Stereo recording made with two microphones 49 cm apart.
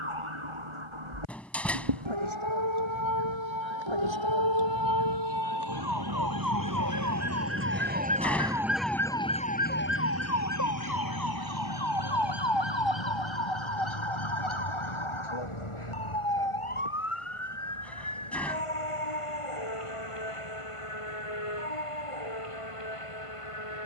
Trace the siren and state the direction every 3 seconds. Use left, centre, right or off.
right, right, right, left, left, left, left, left.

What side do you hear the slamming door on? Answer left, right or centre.
centre.